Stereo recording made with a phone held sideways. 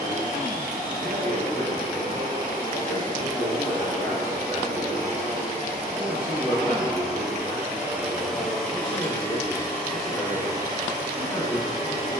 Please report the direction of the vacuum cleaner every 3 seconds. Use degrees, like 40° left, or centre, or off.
60° right, 50° right, 10° right, 20° right.